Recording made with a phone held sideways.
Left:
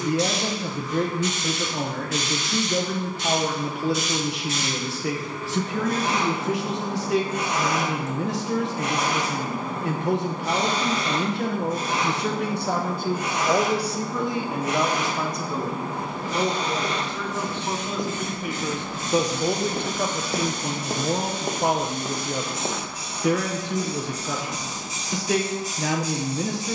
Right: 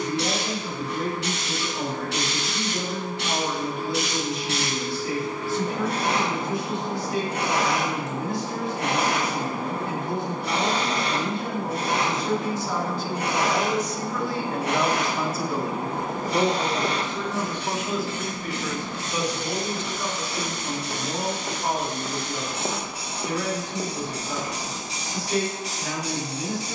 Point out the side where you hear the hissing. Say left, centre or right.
right.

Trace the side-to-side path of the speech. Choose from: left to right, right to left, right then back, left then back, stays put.
right then back.